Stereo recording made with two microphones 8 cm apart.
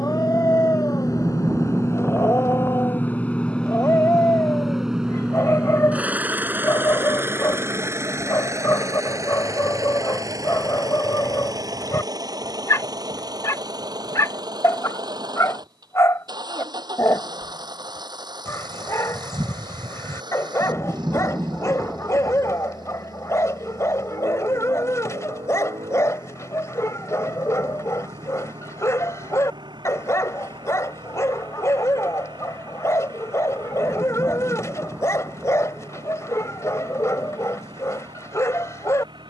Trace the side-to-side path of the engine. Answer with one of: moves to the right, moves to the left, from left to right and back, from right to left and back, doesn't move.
moves to the right.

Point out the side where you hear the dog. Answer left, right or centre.
left.